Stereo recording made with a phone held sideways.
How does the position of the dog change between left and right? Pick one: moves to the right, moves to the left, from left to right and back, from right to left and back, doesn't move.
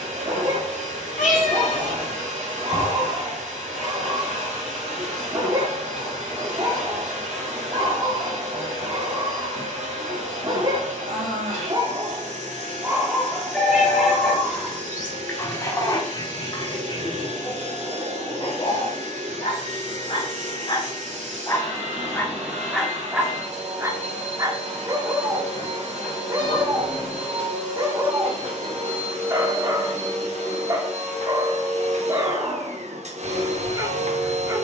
from right to left and back.